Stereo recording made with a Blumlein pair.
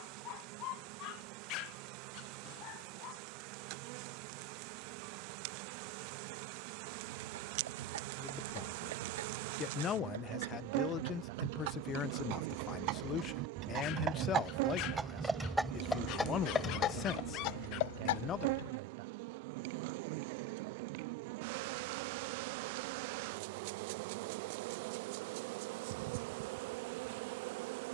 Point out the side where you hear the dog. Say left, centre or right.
left.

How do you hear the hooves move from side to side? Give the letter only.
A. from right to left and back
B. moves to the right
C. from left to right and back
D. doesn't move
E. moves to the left
E.